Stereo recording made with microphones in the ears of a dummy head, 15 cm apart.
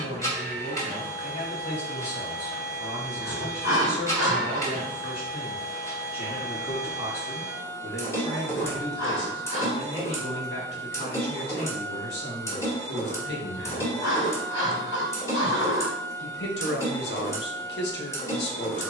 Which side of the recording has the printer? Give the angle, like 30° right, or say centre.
20° left.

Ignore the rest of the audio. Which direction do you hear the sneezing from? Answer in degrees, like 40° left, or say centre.
90° left.